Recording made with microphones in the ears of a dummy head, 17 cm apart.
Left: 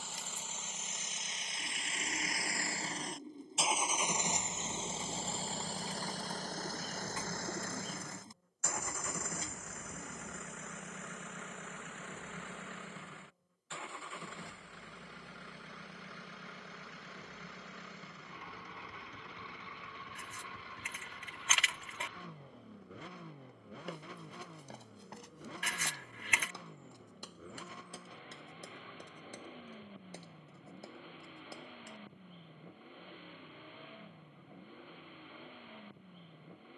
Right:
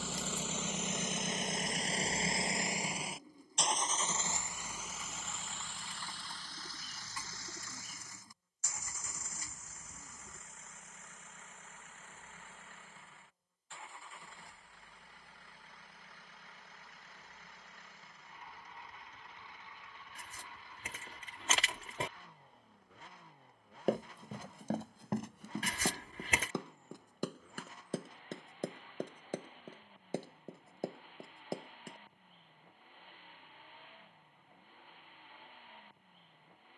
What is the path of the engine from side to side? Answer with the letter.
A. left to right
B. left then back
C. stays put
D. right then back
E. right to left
E.